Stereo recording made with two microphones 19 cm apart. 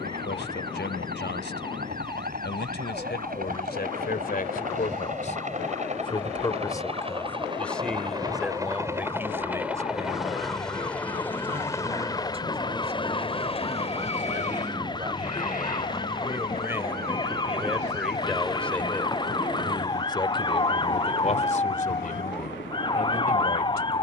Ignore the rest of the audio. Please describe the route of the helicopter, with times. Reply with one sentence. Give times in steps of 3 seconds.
In this clip you hear the helicopter on the right from 0 s, in the centre from 9 s and on the left from 12 s.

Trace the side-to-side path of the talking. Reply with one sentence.
You can hear the talking move from left to right and back again.